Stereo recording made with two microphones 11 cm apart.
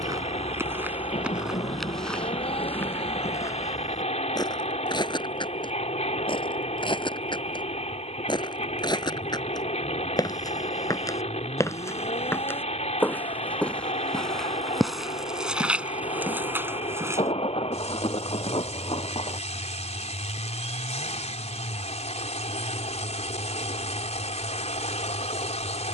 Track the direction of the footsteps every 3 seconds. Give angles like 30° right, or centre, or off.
10° right, 30° left, 50° left, 30° left, 10° left, 10° right, off, off, off.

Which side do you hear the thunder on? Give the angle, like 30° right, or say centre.
60° left.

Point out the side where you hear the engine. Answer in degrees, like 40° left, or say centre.
80° left.